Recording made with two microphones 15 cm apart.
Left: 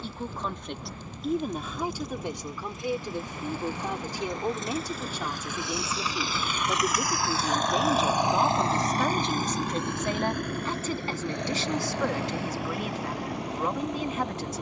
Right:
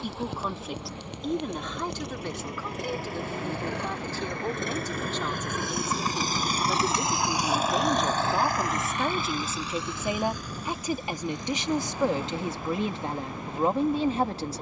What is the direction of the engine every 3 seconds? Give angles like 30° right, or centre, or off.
70° right, 60° right, 10° right, 60° left, 80° left.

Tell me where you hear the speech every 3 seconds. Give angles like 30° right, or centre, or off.
10° left, 10° left, centre, 10° right, 30° right.